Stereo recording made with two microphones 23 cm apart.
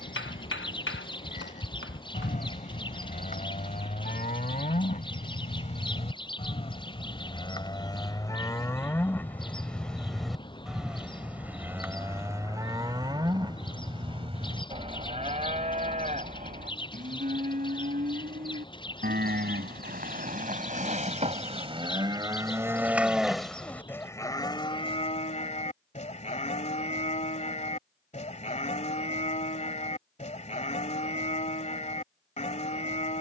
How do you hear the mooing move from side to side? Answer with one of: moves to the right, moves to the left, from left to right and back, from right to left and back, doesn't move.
from left to right and back.